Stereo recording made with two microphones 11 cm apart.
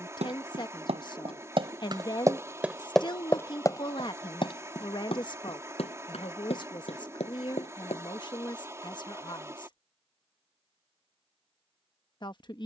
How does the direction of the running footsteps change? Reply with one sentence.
In this clip you hear the running footsteps travel towards the left.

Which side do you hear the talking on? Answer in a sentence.
You can hear the talking on the left.